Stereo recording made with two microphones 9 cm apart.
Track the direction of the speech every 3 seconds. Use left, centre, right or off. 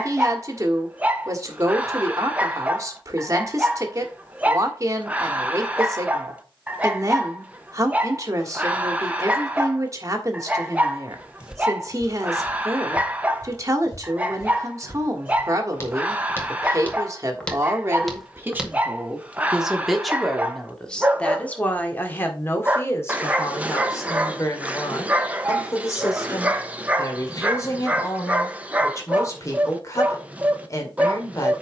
right, right, right, right, right, right, centre, left, left, left, left.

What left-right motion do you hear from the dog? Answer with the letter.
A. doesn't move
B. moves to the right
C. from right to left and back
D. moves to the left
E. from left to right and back
A.